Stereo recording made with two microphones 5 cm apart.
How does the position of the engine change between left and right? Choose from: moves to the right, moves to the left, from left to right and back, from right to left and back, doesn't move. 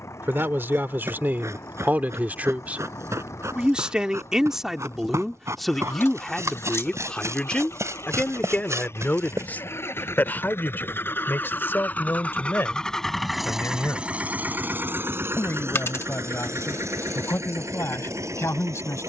moves to the right.